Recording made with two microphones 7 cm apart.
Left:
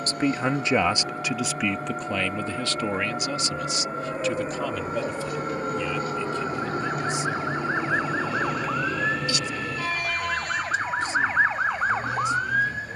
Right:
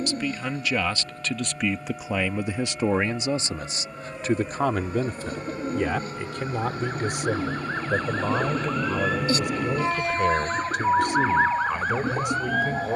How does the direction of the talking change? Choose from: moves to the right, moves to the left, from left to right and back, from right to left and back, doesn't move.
moves to the right.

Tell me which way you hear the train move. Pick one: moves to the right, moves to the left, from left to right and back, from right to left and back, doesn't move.
moves to the right.